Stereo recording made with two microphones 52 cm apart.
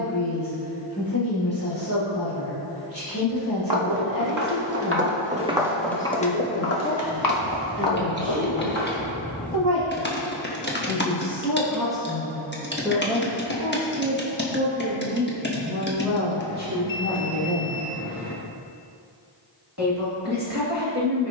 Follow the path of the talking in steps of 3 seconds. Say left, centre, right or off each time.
left, left, left, centre, centre, right, right.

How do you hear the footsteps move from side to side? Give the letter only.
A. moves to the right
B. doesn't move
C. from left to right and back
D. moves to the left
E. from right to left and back
D.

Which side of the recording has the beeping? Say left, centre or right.
left.